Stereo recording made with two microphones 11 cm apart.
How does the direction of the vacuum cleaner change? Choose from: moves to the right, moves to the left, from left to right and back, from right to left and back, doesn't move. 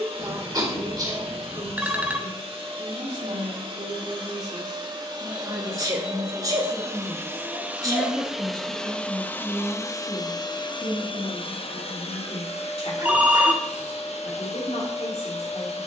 moves to the left.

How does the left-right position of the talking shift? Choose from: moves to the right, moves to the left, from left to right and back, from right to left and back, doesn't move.
moves to the left.